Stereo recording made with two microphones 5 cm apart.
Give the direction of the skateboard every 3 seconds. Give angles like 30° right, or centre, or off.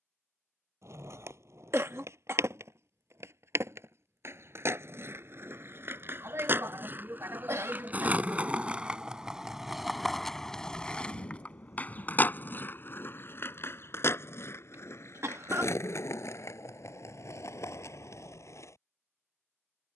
70° right, 60° right, 40° right, 10° left, 50° left, 70° left, 70° left.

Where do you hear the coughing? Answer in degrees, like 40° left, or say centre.
60° right.